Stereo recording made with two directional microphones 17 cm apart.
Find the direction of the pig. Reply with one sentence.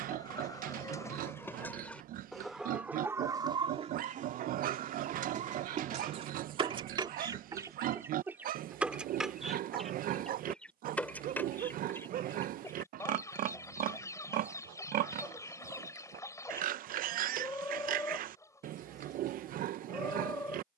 You can hear the pig on the right.